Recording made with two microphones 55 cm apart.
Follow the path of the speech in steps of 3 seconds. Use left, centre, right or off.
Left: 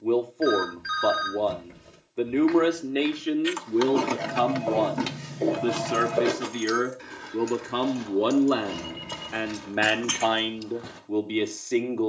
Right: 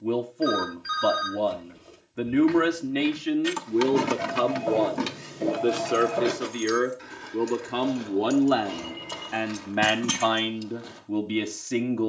right, centre, centre, right.